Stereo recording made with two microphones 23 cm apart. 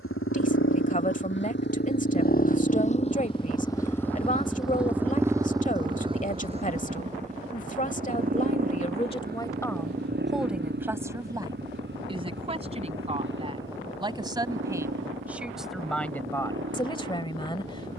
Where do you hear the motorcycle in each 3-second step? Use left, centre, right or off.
left, centre, right, right, right, right.